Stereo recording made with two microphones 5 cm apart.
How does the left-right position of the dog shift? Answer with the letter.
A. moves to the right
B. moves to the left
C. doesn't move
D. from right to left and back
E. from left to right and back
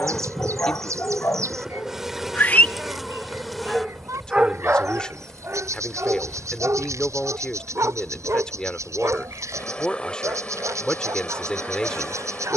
A.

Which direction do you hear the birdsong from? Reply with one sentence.
You can hear the birdsong on the right.